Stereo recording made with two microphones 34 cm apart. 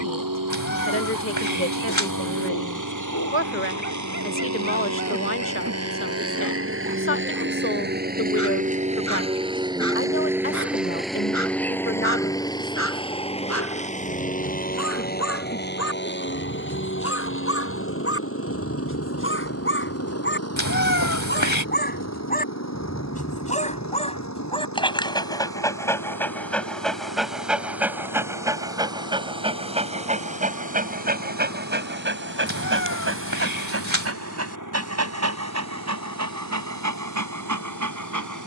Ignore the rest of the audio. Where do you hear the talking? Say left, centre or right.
left.